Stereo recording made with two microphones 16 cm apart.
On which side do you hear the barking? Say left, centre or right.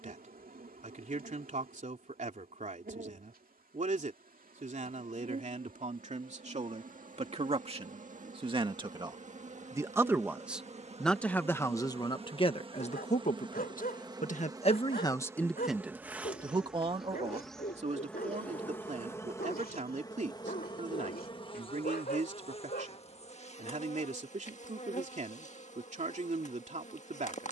left.